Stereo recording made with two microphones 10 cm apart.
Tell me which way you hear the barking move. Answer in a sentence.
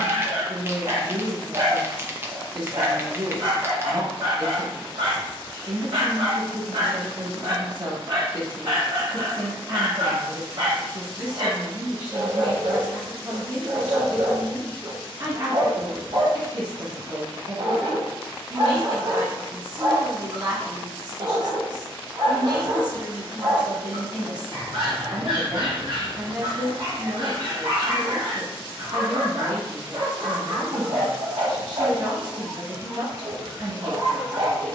You can hear the barking stay in one place.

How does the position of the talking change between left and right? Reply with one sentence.
You can hear the talking stay put.